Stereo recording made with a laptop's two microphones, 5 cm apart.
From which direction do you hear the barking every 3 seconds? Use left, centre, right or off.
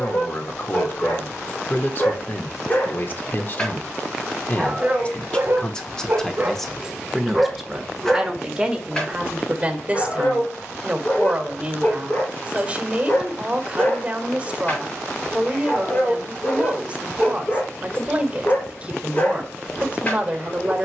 left, centre, centre, left, left, left, left.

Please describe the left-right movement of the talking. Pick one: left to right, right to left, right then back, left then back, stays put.
left to right.